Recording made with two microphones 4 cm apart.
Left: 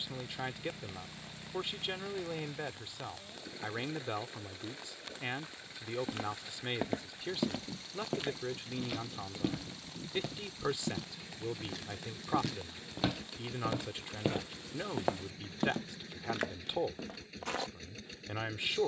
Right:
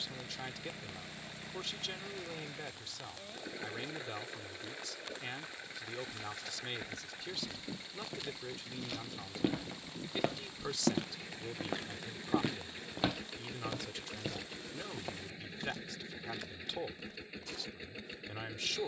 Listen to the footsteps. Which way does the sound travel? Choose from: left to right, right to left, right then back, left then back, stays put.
right then back.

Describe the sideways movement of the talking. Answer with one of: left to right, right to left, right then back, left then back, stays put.
stays put.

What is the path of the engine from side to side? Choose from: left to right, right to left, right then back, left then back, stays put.
stays put.